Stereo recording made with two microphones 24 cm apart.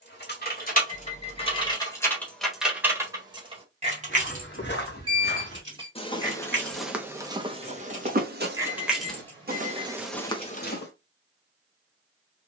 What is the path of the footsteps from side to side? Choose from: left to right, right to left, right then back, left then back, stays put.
right then back.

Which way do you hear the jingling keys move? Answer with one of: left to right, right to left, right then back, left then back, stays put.
right then back.